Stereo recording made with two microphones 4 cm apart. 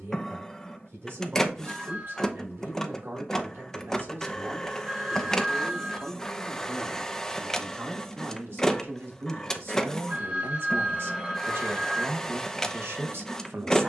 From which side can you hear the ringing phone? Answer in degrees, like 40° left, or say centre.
40° right.